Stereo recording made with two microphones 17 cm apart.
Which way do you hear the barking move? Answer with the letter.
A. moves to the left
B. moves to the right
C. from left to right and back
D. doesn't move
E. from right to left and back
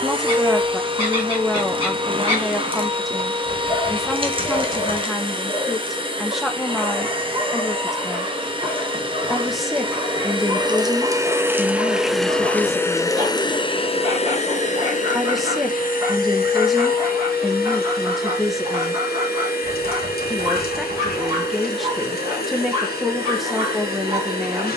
D.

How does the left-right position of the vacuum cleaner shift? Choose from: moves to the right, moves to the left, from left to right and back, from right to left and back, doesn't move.
moves to the left.